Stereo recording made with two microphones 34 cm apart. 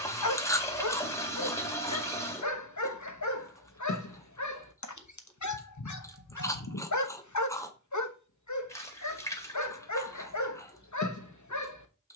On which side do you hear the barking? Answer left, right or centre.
left.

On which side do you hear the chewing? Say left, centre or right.
centre.